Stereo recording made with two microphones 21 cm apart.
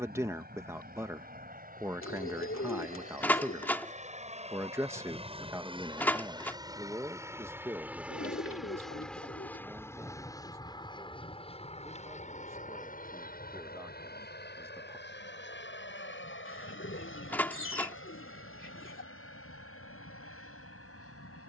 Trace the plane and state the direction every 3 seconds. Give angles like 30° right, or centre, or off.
50° right, 30° right, 10° right, 20° left, 40° left, 60° left, 70° left.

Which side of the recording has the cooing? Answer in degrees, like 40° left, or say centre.
70° left.